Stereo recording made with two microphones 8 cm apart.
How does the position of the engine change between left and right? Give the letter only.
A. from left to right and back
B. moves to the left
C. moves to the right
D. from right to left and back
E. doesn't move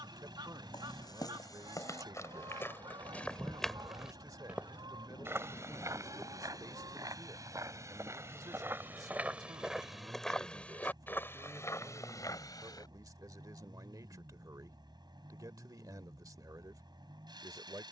E.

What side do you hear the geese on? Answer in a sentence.
You can hear the geese on the right.